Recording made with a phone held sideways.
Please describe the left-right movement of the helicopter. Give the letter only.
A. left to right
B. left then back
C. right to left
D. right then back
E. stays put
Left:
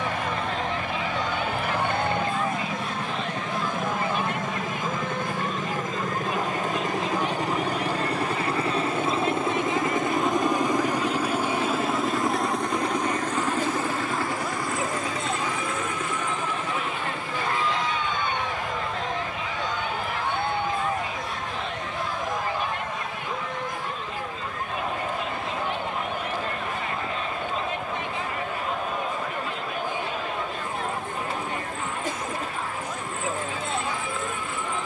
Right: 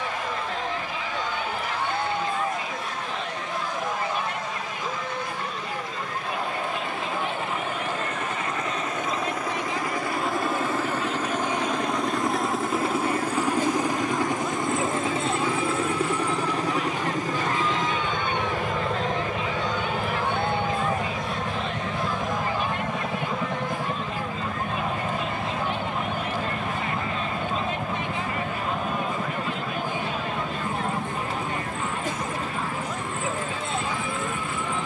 A.